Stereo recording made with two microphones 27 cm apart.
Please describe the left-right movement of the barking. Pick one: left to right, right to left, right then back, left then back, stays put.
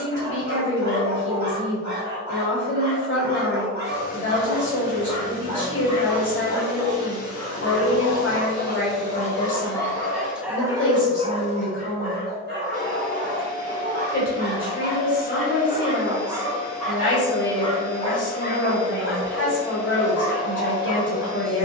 right then back.